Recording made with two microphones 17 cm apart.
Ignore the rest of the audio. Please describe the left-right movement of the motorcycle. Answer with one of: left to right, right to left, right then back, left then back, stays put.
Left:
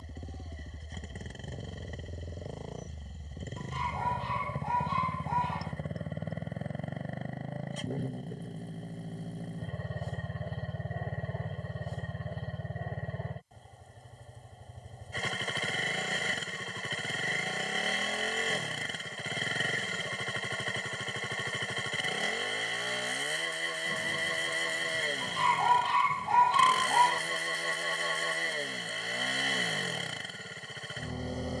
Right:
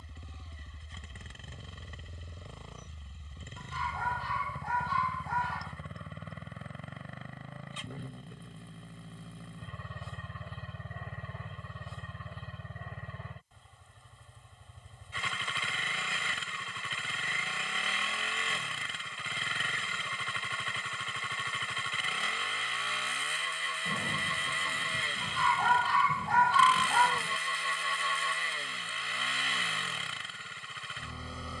stays put.